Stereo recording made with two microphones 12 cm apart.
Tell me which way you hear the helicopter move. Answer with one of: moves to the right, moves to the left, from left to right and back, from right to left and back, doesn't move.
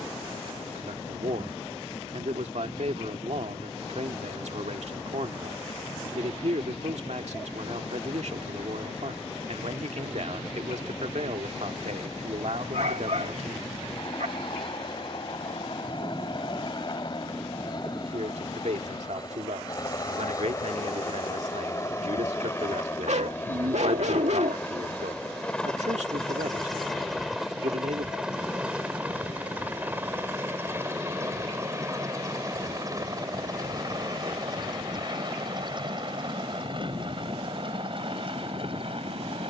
moves to the right.